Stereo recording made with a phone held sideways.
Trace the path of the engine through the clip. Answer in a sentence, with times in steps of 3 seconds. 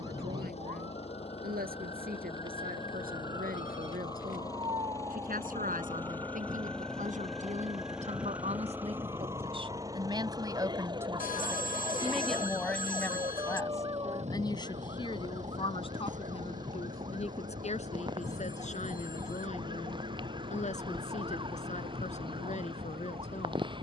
In this clip you hear the engine on the left from 0 s, in the centre from 6 s and on the right from 9 s.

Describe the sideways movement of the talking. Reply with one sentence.
In this clip you hear the talking travel towards the left.